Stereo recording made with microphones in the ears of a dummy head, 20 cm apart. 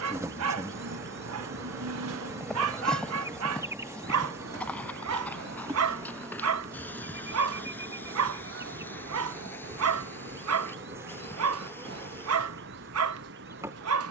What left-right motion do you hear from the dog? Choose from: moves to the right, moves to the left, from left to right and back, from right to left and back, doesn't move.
doesn't move.